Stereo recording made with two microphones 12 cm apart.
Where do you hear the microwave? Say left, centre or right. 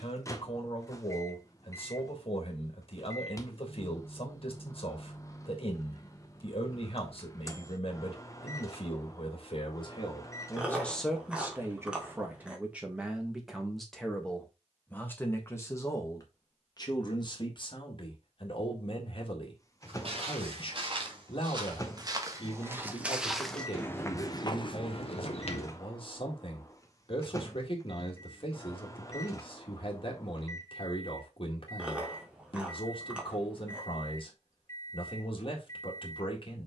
left.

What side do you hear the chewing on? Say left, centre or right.
centre.